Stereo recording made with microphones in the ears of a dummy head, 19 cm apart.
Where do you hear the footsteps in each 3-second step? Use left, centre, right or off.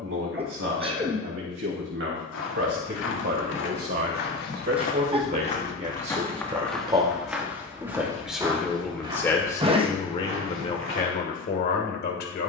left, left, centre, right.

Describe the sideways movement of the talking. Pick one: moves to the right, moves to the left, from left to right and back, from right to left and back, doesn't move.
moves to the left.